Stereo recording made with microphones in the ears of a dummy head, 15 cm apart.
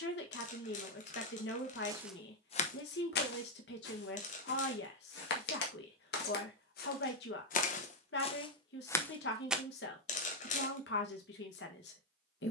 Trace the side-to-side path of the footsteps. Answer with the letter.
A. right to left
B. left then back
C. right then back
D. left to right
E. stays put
B.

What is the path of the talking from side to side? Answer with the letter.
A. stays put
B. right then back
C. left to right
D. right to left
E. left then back
A.